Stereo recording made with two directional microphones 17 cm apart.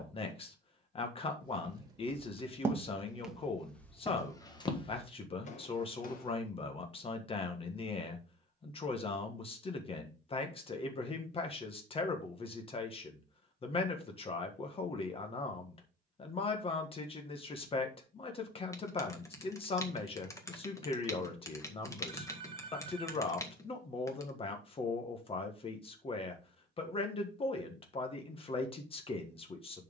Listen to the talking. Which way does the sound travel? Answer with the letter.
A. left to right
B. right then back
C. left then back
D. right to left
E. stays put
E.